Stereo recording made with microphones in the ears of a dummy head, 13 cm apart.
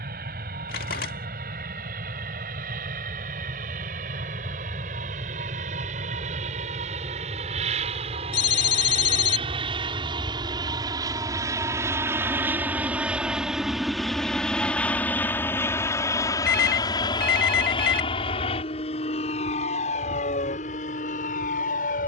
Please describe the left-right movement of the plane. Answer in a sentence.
You can hear the plane go from the right side to the left.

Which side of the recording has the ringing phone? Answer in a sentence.
In this clip you hear the ringing phone on the left.